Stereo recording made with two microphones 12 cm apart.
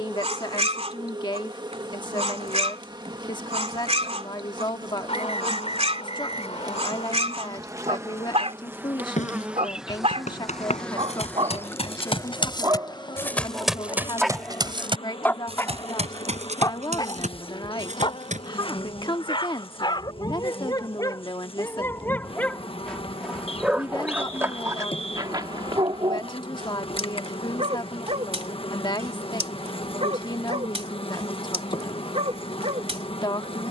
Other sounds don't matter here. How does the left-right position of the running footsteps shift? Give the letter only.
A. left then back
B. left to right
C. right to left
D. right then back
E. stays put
B.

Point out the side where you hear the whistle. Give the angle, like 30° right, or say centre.
60° left.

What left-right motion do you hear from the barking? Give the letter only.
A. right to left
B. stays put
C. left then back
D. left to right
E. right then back
C.